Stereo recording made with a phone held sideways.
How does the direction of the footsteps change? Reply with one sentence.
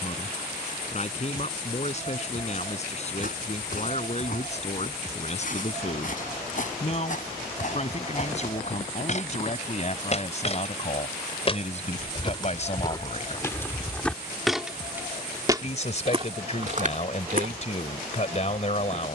You can hear the footsteps move from left to right.